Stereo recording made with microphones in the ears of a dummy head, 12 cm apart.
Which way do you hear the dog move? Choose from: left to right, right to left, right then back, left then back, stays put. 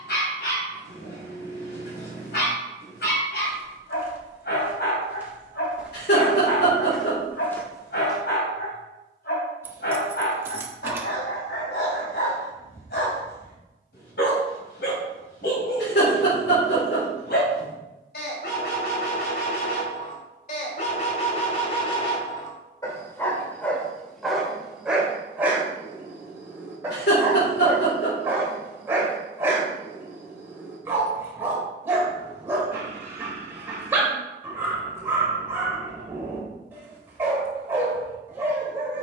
left to right.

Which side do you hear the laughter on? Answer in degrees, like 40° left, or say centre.
80° left.